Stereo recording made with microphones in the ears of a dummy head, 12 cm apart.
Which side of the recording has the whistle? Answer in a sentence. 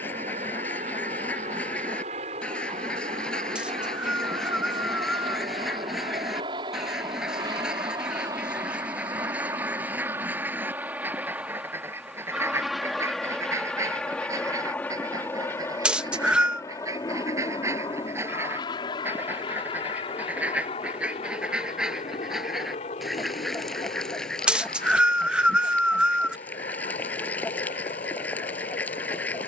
In this clip you hear the whistle in the centre.